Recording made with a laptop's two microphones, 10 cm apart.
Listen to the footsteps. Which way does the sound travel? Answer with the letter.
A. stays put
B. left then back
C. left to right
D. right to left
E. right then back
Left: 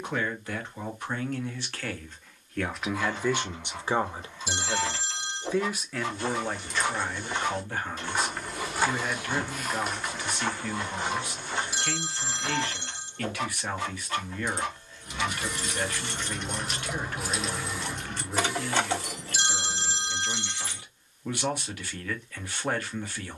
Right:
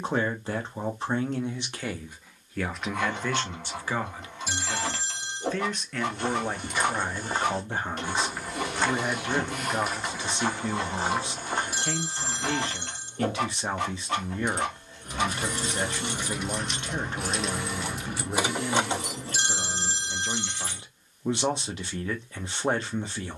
B.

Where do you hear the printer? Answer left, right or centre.
right.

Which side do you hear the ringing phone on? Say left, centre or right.
right.